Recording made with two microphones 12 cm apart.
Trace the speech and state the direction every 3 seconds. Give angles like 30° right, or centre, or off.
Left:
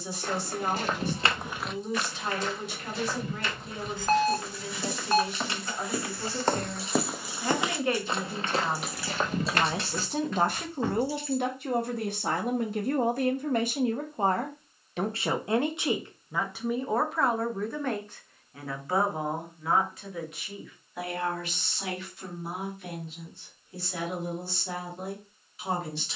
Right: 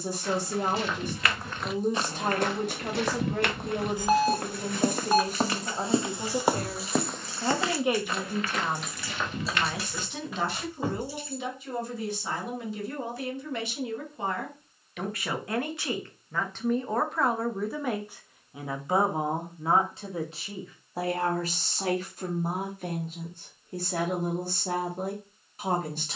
50° right, 50° right, 20° right, 50° left, 50° left, 10° left, 20° right, 40° right, 50° right.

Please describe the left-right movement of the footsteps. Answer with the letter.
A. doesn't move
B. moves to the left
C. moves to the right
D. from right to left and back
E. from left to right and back
E.